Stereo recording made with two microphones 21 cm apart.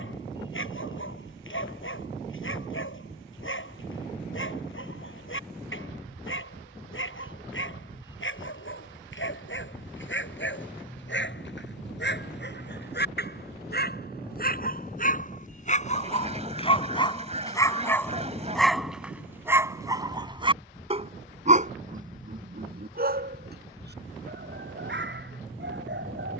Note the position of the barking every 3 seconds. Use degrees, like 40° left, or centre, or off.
70° left, 70° left, 70° left, 60° left, 50° left, 30° left, 10° right, 40° right, 60° right.